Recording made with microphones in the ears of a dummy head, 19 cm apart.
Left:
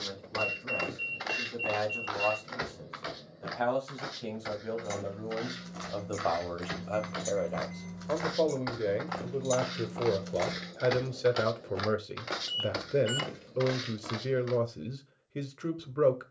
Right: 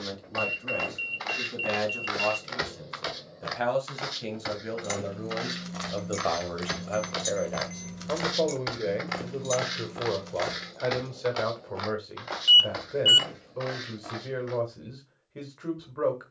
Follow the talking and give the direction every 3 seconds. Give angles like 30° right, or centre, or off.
30° right, 30° right, 10° right, 20° left, 30° left, 30° left.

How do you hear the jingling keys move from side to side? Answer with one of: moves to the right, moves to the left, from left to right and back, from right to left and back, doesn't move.
moves to the left.